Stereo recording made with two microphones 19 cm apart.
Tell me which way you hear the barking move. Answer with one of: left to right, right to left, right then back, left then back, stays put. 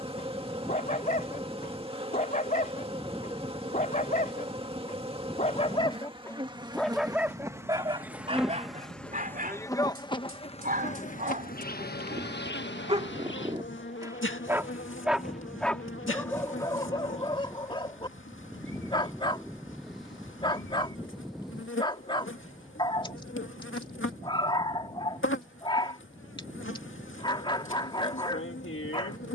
right then back.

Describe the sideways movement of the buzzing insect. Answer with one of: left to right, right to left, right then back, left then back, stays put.
right to left.